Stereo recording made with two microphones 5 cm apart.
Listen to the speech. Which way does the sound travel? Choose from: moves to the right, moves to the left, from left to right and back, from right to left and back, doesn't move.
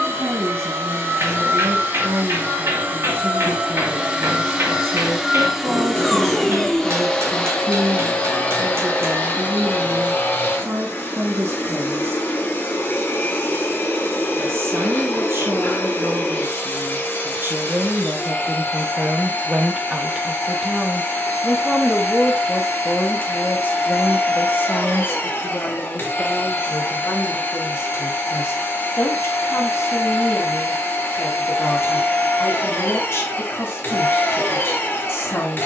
moves to the left.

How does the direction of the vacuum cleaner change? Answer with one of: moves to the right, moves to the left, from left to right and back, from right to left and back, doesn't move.
moves to the left.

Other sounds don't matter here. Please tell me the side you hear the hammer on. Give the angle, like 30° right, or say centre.
60° right.